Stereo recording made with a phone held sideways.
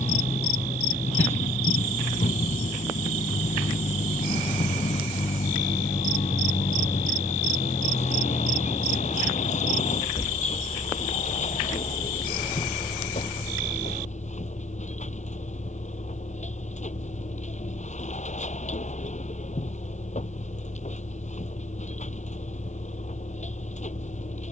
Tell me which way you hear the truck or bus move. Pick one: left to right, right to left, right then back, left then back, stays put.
stays put.